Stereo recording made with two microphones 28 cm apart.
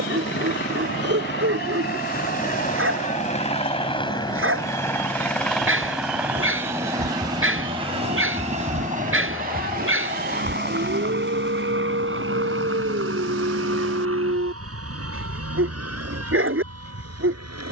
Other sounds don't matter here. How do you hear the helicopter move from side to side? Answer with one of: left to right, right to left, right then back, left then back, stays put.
left to right.